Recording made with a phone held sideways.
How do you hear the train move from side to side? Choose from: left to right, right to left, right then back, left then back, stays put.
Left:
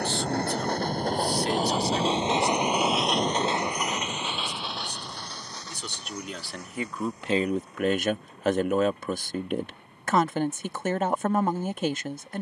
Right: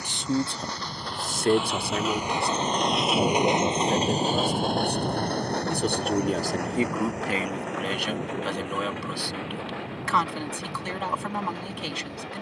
left to right.